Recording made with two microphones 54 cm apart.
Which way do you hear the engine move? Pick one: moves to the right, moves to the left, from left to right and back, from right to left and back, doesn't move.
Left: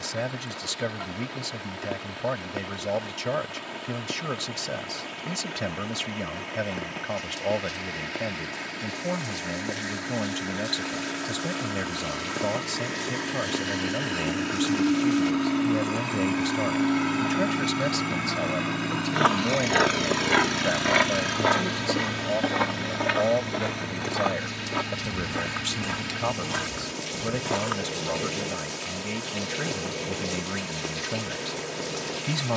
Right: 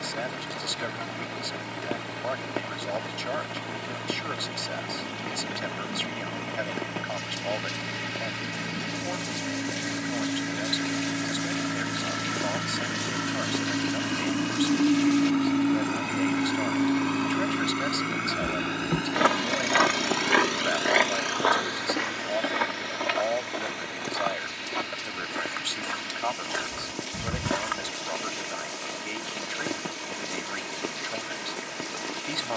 moves to the left.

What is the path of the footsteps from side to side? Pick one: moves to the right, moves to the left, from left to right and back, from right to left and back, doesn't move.
from right to left and back.